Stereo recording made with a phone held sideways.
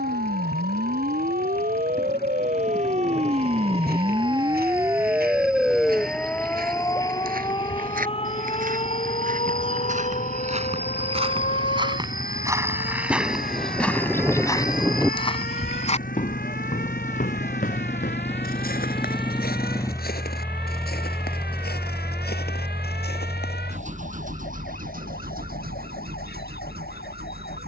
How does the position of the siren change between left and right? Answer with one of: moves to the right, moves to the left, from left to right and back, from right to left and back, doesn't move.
moves to the left.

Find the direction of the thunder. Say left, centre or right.
centre.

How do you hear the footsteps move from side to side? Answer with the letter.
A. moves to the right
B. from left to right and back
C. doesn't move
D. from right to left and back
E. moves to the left
E.